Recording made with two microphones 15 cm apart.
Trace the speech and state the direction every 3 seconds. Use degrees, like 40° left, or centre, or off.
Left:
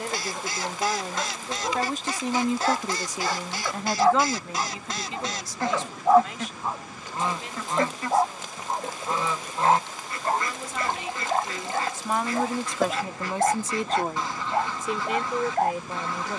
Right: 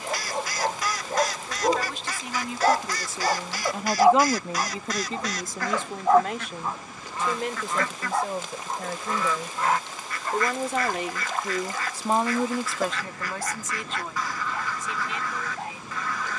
50° left, 30° right, 70° right, 60° right, 20° left, 60° left.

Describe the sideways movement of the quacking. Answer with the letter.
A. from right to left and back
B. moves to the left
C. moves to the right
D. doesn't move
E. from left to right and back
D.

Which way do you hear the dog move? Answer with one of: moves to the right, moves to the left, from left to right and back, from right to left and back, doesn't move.
moves to the left.